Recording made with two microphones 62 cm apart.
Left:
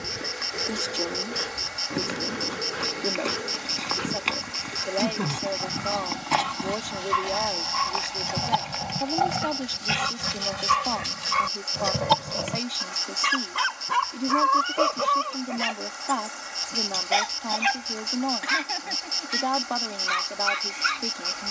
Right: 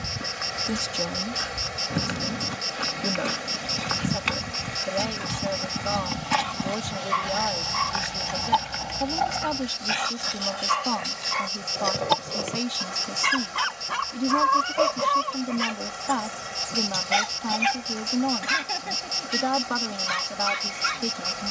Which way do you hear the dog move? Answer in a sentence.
In this clip you hear the dog move from left to right.